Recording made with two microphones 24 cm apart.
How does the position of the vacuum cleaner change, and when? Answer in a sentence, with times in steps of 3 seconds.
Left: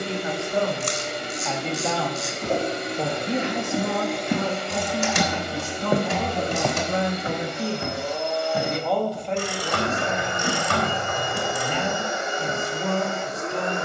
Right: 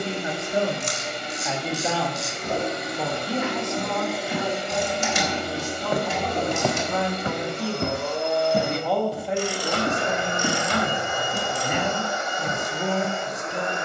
You can hear the vacuum cleaner on the left from 0 s, in the centre from 3 s, on the right from 6 s and on the left from 12 s.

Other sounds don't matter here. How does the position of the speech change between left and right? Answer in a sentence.
In this clip you hear the speech go left and come back.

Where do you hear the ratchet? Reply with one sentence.
In this clip you hear the ratchet on the left.